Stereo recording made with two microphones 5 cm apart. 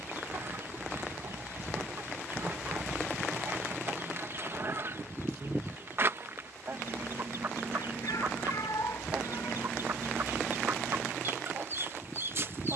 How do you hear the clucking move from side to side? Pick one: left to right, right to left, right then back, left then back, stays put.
stays put.